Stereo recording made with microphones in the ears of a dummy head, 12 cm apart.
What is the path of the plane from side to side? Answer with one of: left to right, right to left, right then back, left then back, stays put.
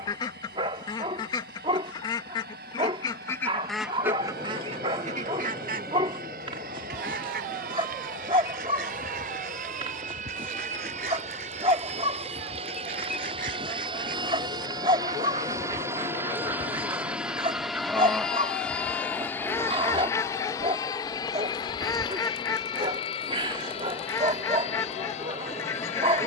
right to left.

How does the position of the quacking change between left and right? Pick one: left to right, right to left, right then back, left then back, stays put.
right then back.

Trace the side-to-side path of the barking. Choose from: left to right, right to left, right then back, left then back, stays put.
stays put.